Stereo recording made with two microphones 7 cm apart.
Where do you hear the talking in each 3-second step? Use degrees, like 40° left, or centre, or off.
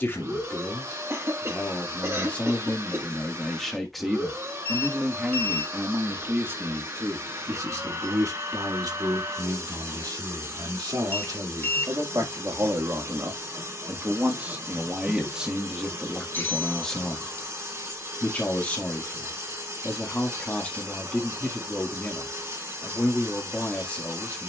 20° left, 10° right, 40° right, 60° right, 30° right, centre, 20° left, 20° left.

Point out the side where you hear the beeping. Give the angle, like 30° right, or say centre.
30° left.